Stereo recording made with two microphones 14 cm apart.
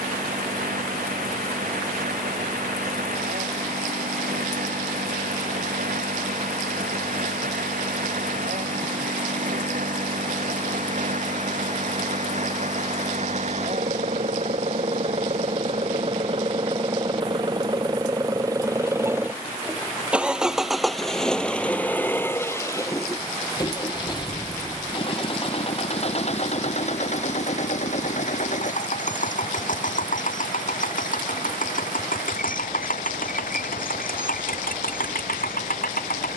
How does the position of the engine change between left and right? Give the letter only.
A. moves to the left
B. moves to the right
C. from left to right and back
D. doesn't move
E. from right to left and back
A.